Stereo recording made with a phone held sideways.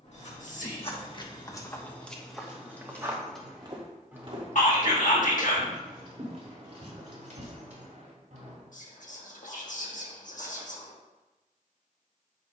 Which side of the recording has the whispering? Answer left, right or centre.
left.